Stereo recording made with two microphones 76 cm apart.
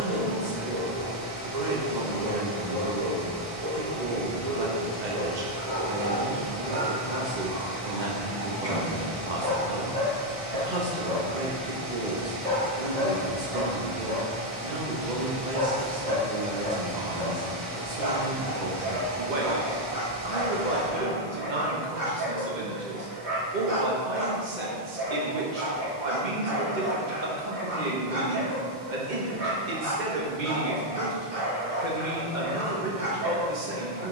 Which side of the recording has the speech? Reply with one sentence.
You can hear the speech on the right.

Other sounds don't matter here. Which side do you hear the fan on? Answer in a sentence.
In this clip you hear the fan on the right.